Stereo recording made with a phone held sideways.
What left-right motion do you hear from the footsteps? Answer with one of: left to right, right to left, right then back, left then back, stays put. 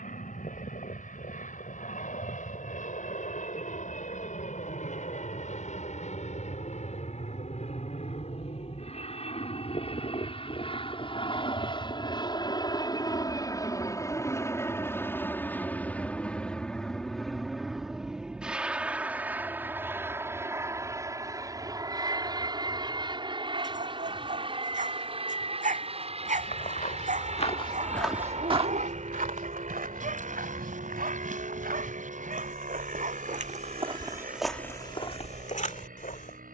right then back.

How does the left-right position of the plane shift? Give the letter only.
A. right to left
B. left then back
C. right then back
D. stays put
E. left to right
E.